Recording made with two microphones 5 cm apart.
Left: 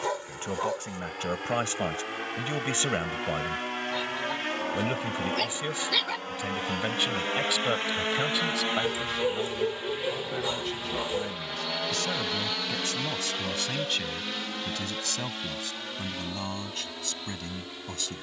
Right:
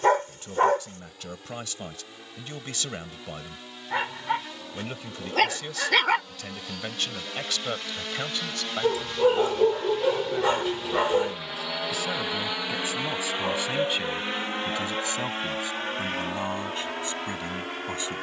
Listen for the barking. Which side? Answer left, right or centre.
right.